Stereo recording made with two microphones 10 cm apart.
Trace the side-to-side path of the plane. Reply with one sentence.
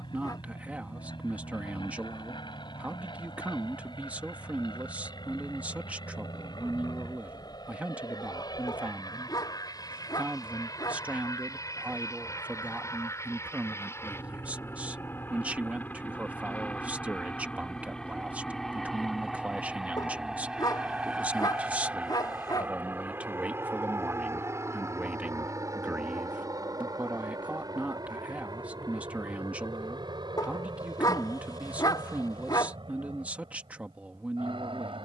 In this clip you hear the plane travel towards the right.